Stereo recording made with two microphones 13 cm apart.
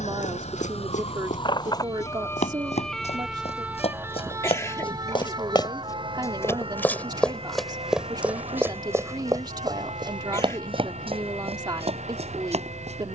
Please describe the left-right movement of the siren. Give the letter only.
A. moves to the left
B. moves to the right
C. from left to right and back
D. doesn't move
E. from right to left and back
B.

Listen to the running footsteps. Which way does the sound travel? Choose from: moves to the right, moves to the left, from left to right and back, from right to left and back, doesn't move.
moves to the right.